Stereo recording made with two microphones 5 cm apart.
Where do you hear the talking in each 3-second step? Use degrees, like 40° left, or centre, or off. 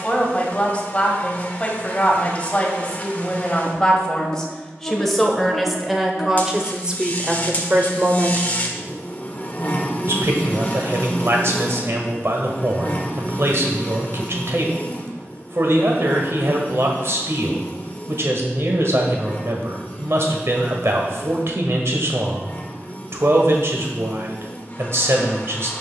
20° left, 10° left, 20° right, 60° right, 60° right, 60° right, 60° right, 60° right, 60° right.